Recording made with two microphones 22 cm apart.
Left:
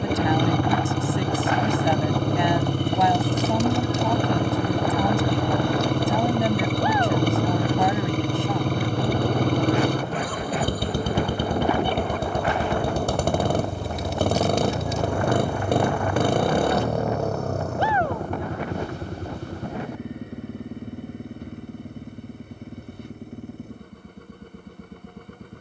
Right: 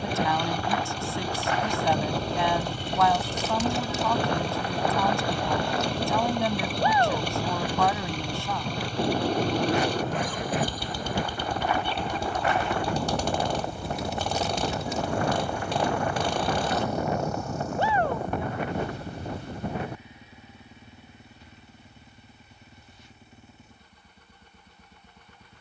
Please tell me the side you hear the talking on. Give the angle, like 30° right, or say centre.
20° left.